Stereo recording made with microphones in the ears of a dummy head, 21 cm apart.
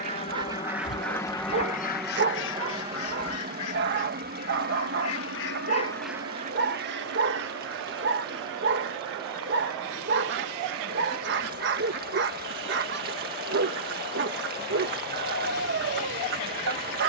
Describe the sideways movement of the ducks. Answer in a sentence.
You can hear the ducks move from right to left and back again.